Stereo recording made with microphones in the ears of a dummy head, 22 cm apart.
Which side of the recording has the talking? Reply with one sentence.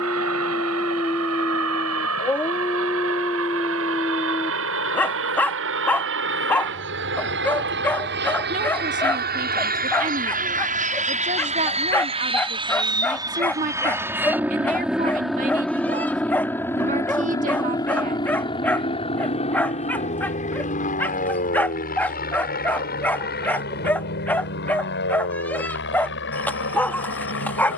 In this clip you hear the talking on the right.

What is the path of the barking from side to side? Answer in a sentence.
You can hear the barking stay in one place.